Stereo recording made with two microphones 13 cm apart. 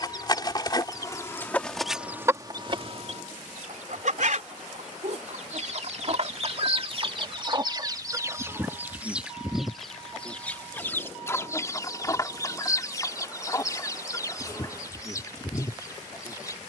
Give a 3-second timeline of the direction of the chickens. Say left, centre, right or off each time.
centre, right, right, centre, left, left.